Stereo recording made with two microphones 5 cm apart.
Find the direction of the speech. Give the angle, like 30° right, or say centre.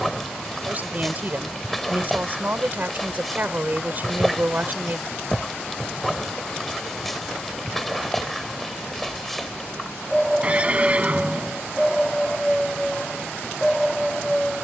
40° right.